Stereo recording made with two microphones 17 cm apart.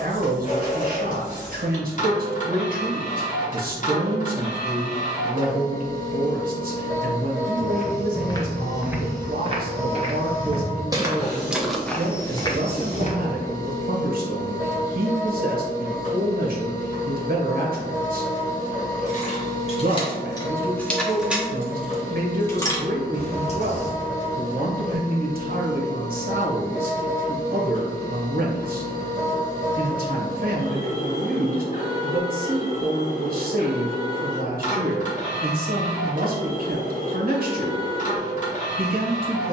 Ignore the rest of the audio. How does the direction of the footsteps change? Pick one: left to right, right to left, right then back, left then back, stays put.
right then back.